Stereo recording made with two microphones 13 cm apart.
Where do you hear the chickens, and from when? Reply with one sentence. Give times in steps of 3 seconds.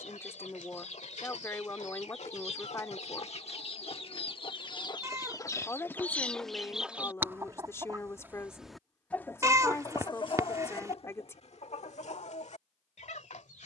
You can hear the chickens on the left from 0 s, in the centre from 6 s and on the left from 9 s.